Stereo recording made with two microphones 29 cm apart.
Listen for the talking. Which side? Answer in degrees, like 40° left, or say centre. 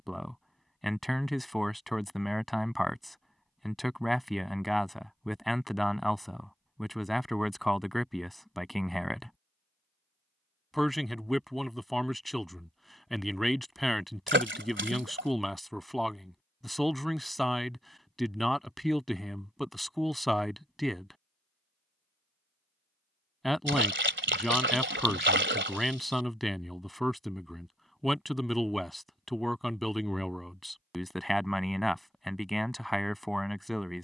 centre.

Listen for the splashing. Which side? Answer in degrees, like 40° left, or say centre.
40° right.